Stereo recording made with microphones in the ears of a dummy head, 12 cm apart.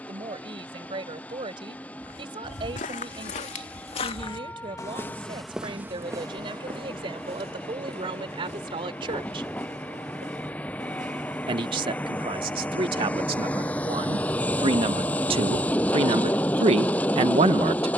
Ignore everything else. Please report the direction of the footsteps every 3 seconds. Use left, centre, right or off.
left, left, right, right, off, off.